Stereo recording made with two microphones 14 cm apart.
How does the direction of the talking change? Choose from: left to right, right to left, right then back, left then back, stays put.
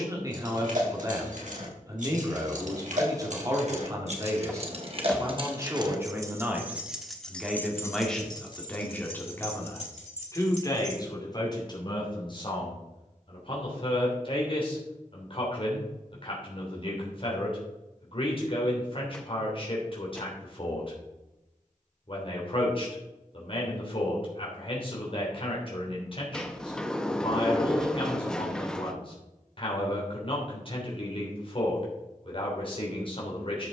right to left.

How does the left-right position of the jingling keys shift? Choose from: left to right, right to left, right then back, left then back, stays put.
right to left.